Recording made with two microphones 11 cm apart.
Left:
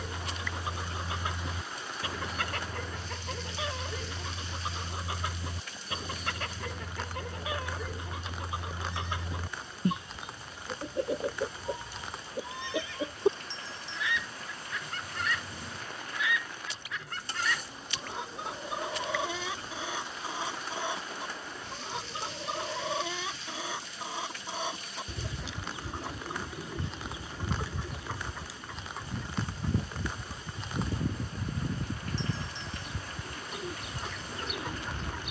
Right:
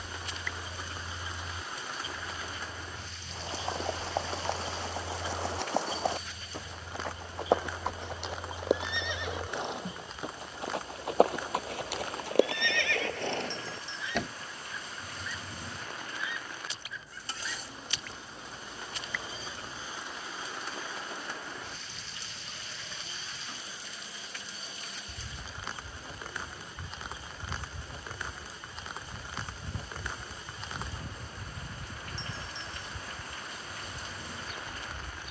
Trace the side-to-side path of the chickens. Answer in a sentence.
You can hear the chickens stay put.